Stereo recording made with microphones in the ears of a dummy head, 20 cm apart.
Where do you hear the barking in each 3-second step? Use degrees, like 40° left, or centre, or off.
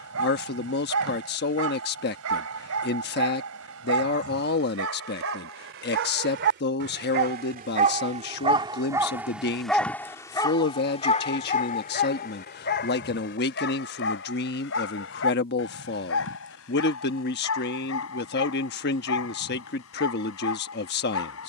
70° right, 70° right, 40° right, 20° left, 50° left, 70° left, 70° left.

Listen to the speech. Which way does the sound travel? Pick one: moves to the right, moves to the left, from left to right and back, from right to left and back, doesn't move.
doesn't move.